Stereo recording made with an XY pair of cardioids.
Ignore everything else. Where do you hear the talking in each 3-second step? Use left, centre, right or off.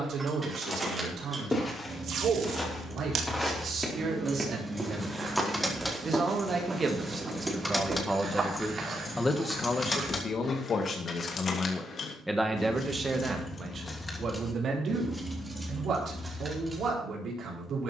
right, right, right, left, right, right.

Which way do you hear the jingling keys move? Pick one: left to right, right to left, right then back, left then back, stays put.
left then back.